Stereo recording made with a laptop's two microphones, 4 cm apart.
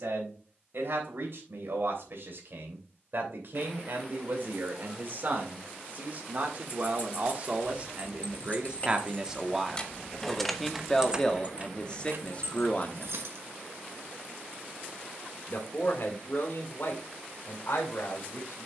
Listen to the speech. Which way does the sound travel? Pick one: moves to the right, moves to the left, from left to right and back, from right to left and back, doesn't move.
moves to the left.